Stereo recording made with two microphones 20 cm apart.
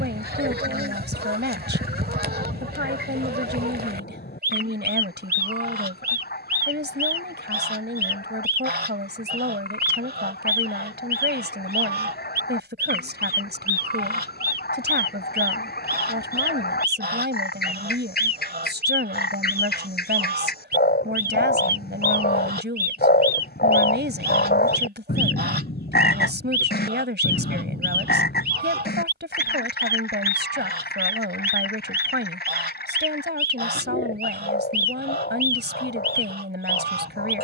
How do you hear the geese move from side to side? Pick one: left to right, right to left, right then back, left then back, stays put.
stays put.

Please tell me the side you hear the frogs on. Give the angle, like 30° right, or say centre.
60° left.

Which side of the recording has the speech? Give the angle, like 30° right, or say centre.
70° right.